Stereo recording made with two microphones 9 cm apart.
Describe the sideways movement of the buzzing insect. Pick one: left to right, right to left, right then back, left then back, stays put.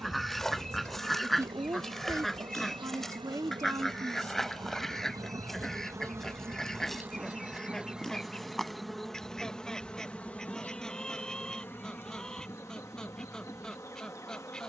right to left.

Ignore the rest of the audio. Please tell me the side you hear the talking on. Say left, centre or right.
right.